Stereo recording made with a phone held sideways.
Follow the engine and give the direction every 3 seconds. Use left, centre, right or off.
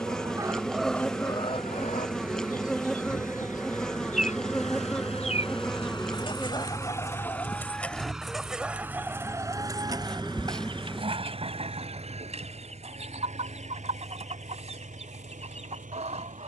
left, left, centre, right, right, right.